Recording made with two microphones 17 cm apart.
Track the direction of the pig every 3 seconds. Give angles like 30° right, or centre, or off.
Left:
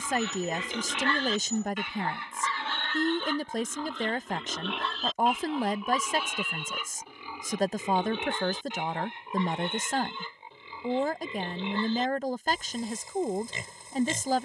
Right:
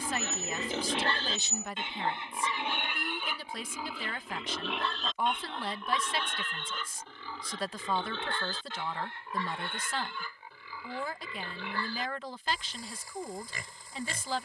30° right, centre, 10° left, 20° left, 20° left.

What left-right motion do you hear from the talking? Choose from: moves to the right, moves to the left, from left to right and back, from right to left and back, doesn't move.
doesn't move.